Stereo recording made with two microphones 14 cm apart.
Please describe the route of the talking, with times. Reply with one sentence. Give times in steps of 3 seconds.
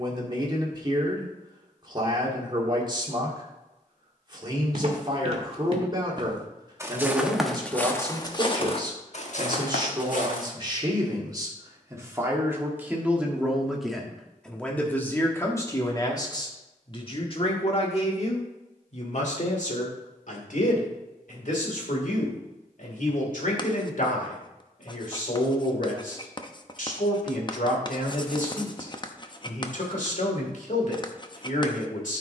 In this clip you hear the talking on the right from 0 s, in the centre from 12 s and on the left from 15 s.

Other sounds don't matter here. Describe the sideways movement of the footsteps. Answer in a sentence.
You can hear the footsteps move to the left.